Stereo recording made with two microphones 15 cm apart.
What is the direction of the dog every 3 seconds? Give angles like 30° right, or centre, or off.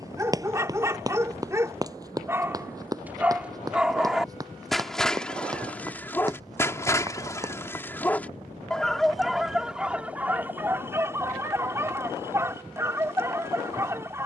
20° right, centre, 10° left, 10° right, 20° right.